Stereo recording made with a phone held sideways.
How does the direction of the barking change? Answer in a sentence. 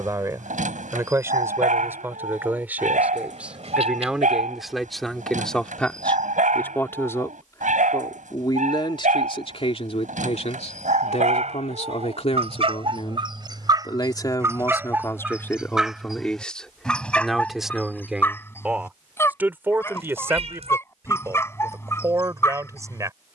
In this clip you hear the barking go from the right side to the left.